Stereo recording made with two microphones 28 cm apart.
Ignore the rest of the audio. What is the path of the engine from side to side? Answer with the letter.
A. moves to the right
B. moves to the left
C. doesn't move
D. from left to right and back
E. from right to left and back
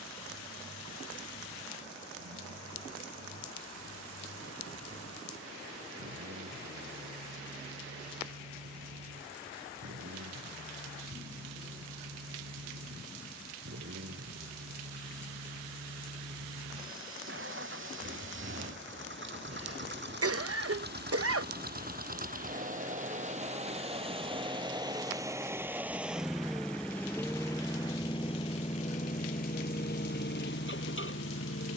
B.